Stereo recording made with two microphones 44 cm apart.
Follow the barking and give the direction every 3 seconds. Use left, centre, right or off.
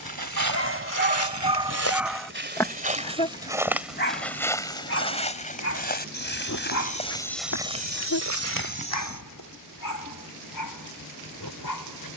centre, left, left, left.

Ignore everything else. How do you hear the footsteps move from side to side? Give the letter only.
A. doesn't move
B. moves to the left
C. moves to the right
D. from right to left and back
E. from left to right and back
D.